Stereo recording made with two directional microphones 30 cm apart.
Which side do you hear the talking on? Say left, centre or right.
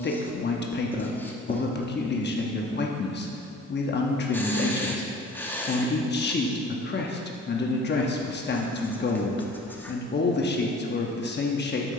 left.